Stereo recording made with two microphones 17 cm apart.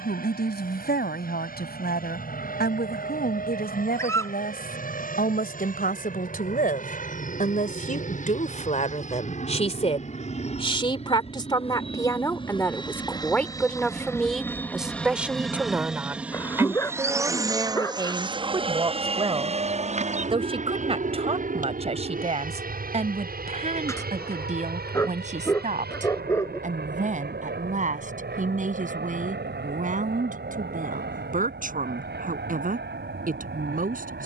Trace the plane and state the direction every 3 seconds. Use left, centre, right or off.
left, left, left, left, left, centre, right, right, right, right, right, right.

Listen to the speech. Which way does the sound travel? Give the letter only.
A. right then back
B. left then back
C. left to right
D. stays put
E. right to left
C.